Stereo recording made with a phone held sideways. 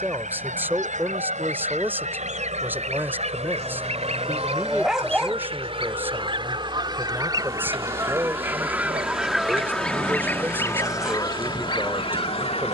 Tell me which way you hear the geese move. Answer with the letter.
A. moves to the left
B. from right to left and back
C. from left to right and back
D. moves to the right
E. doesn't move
A.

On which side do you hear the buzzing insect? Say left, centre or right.
right.